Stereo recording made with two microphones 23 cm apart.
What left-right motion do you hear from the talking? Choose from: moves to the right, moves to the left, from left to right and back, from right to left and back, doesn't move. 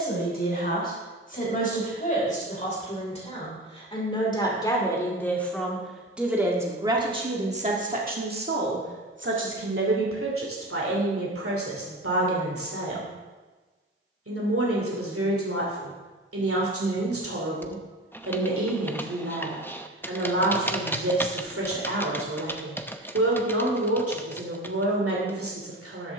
moves to the right.